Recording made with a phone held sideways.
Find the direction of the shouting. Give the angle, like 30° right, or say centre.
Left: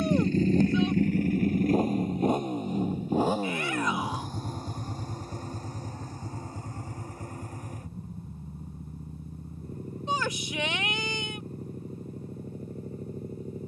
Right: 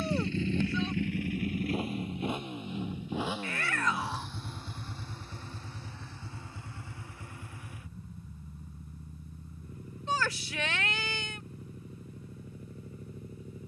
20° left.